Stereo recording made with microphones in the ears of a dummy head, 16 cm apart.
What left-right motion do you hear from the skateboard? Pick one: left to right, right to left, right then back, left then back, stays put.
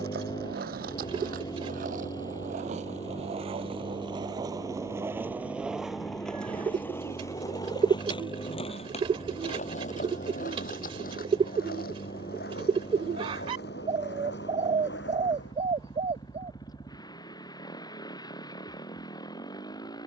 right to left.